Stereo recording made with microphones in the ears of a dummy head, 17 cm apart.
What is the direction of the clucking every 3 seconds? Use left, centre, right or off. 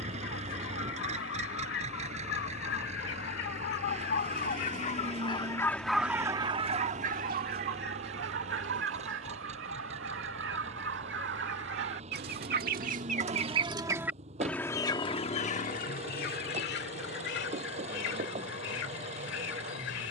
left, left, right, right, right, left, left.